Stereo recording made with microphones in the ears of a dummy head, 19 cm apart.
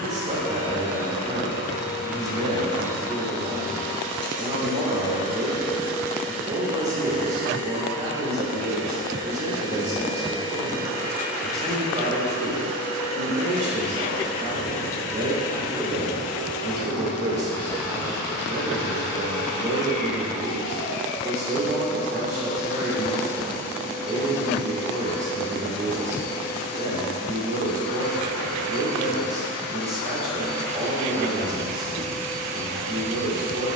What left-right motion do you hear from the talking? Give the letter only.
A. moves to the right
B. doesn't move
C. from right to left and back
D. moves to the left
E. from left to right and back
B.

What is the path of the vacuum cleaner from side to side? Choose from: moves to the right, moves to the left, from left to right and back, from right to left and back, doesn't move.
from left to right and back.